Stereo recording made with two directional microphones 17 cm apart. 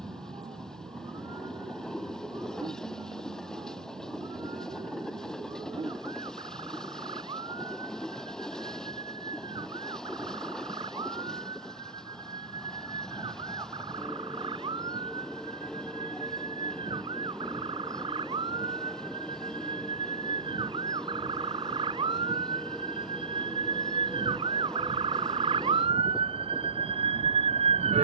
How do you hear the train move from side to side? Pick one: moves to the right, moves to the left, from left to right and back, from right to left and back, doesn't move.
doesn't move.